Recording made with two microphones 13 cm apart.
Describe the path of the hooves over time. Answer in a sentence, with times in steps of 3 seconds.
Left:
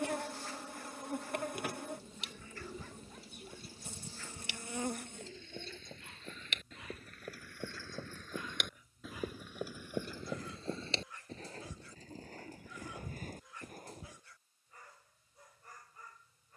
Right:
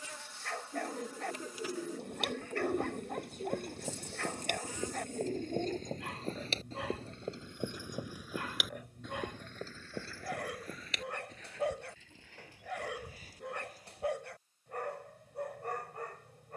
In this clip you hear the hooves on the right from 0 s, on the left from 9 s and not at all from 15 s.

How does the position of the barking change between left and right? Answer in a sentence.
You can hear the barking stay put.